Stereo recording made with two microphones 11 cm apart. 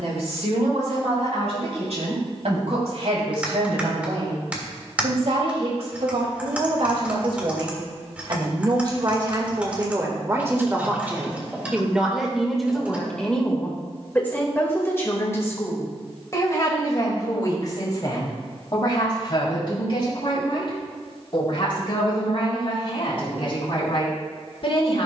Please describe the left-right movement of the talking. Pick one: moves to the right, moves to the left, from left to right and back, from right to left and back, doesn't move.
moves to the left.